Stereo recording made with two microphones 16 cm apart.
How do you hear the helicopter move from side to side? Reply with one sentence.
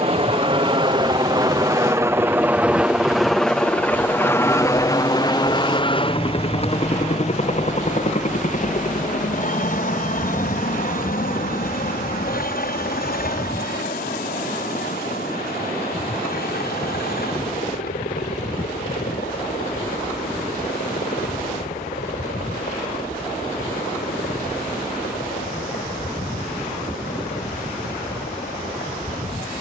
You can hear the helicopter move from right to left.